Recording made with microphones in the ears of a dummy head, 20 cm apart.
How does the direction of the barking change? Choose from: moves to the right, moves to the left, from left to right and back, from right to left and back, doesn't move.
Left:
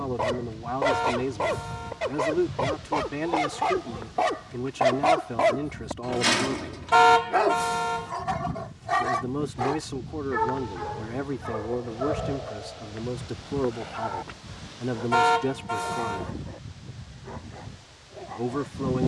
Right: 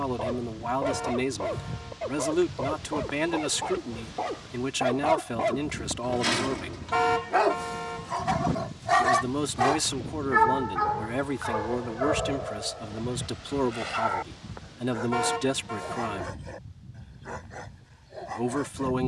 moves to the right.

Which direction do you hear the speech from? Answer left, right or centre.
right.